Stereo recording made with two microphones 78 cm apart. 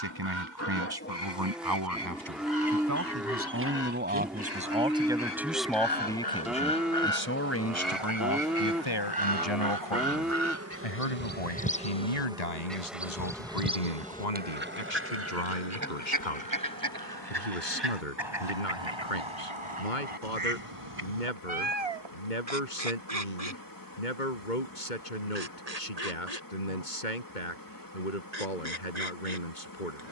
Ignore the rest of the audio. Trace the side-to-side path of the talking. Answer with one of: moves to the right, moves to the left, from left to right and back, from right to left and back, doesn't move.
moves to the left.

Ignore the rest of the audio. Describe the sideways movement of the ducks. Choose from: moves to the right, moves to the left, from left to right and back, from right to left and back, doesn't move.
moves to the right.